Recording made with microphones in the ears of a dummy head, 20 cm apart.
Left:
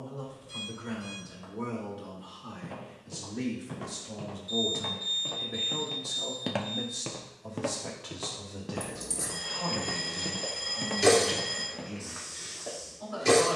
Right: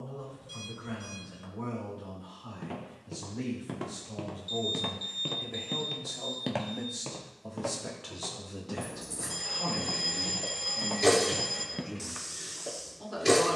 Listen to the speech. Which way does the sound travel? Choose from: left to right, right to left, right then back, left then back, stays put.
left to right.